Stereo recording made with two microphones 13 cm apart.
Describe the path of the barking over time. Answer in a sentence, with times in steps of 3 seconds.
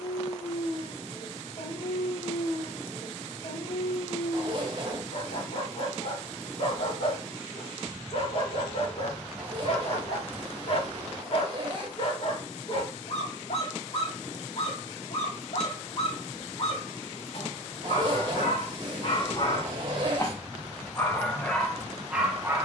In this clip you hear the barking on the left from 0 s and in the centre from 21 s.